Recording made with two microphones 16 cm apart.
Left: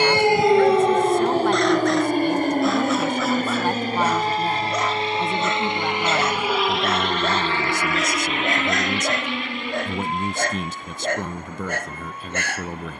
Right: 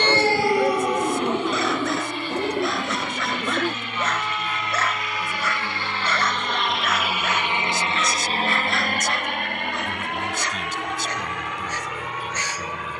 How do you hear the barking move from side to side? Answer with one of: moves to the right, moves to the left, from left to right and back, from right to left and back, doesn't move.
moves to the left.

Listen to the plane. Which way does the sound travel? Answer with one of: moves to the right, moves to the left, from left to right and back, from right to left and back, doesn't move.
moves to the right.